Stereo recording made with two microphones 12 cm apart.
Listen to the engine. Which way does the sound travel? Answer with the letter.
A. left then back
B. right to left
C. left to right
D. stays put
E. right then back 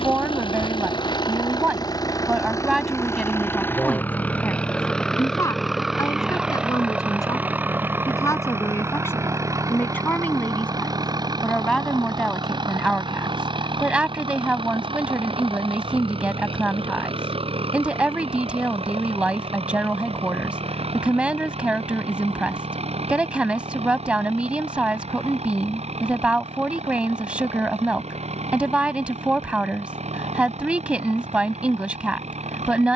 C.